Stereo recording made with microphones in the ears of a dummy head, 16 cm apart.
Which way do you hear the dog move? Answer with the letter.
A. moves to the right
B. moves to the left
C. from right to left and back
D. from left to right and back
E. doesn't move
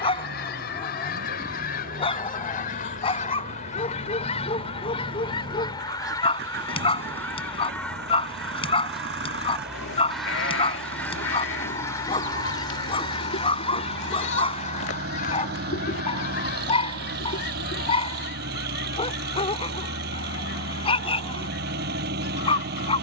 E.